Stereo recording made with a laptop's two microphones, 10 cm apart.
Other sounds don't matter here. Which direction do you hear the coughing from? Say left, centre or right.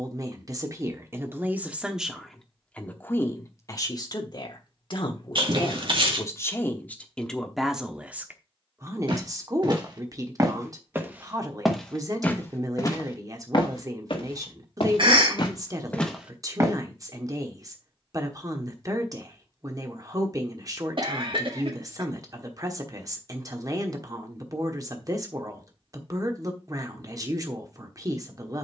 right.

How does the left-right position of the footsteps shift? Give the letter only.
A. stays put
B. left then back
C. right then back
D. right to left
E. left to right
B.